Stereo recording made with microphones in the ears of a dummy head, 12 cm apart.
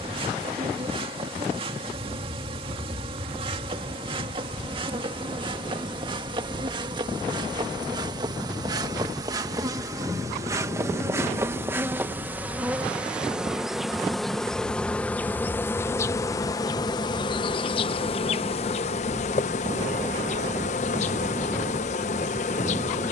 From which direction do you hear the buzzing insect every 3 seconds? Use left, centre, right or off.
right, right, right, right, centre, left, left, left.